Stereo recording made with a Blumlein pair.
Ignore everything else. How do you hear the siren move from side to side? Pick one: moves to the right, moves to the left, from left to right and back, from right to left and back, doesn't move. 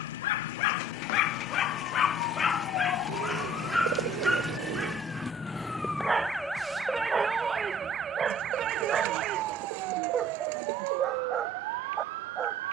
moves to the right.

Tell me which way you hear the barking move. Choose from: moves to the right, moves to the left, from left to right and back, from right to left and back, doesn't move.
moves to the right.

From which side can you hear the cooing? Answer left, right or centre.
right.